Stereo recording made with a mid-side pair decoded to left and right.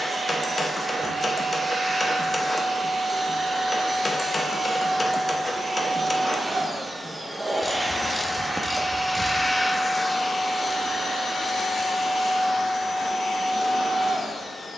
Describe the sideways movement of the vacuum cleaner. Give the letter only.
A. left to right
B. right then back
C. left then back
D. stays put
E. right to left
E.